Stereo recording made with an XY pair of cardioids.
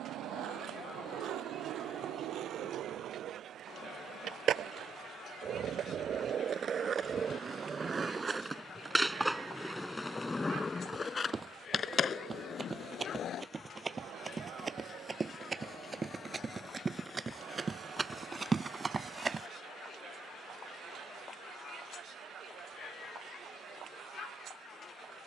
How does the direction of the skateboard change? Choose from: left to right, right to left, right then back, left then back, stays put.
right to left.